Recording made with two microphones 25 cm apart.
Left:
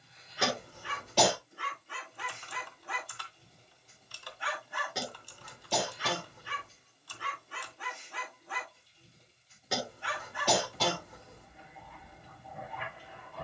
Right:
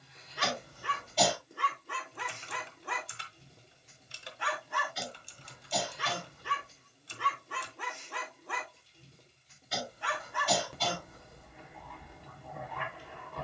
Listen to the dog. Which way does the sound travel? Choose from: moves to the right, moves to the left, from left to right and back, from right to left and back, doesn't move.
doesn't move.